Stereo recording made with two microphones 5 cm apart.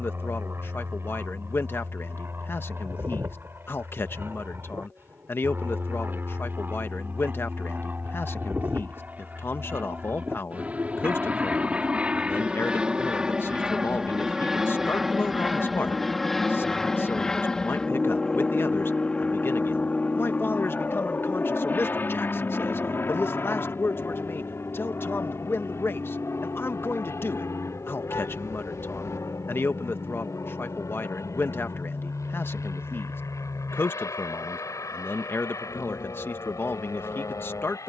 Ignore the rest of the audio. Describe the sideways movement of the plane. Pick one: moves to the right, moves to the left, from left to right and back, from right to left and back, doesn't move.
moves to the left.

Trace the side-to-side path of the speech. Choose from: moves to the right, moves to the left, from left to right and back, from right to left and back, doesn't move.
doesn't move.